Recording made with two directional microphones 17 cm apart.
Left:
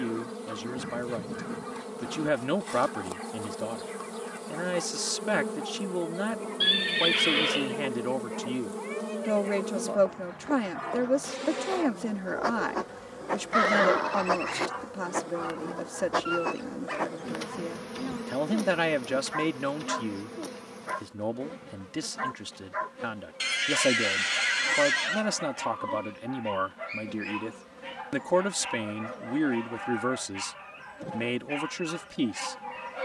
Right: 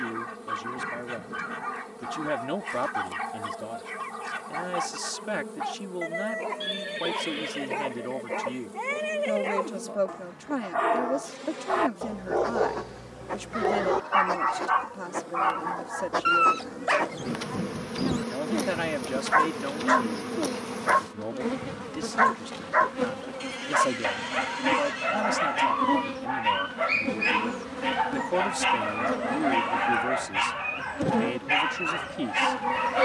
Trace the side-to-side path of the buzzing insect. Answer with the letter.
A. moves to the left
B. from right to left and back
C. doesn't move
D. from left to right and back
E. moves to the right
E.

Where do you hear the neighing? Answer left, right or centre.
left.